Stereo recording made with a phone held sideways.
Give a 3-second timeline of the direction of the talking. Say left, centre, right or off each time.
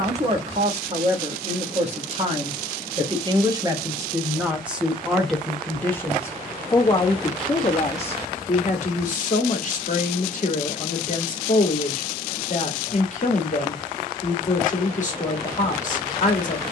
right, centre, left, left, left, left.